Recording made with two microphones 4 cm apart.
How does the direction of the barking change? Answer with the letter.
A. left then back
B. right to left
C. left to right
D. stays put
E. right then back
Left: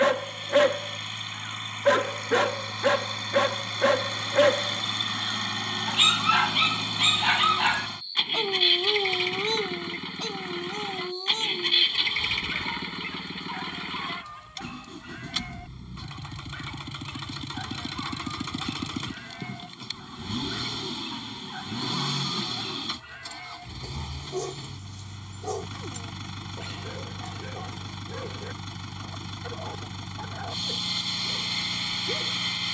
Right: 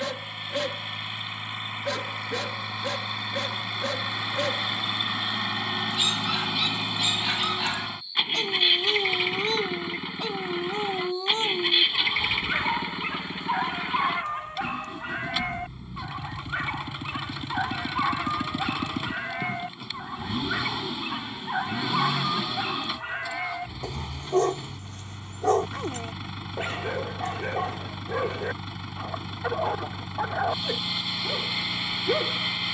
C.